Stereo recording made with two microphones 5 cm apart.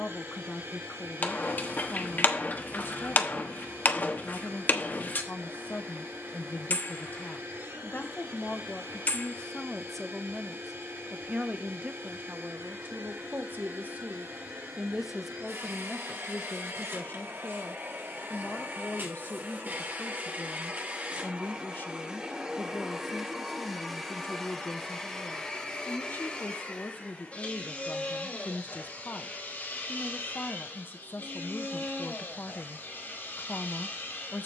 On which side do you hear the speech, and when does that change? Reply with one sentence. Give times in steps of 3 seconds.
You can hear the speech on the left from 0 s, in the centre from 9 s, on the right from 12 s and on the left from 15 s.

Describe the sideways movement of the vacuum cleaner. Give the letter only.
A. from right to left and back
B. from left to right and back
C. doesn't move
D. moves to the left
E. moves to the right
D.